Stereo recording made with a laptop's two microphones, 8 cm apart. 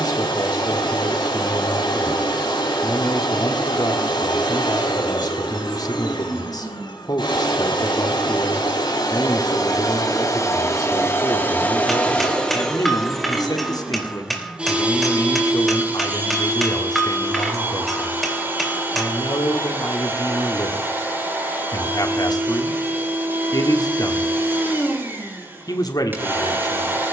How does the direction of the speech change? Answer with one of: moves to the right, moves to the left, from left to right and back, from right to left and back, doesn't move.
doesn't move.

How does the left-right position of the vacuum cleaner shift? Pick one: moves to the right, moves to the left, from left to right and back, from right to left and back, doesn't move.
moves to the right.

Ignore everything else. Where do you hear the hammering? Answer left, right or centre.
centre.